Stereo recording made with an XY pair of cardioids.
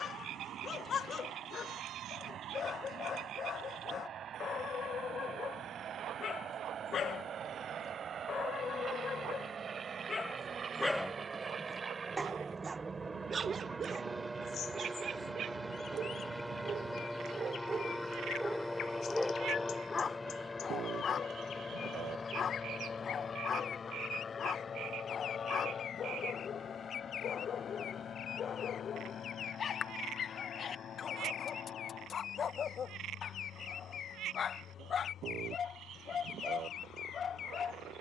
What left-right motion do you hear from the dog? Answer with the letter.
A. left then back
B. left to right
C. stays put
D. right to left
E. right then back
E.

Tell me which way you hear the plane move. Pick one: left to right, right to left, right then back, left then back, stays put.
right to left.